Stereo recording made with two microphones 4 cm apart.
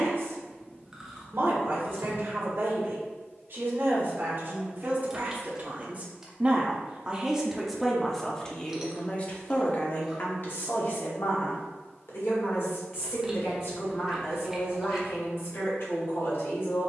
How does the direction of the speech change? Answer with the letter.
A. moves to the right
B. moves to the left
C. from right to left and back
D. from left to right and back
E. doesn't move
B.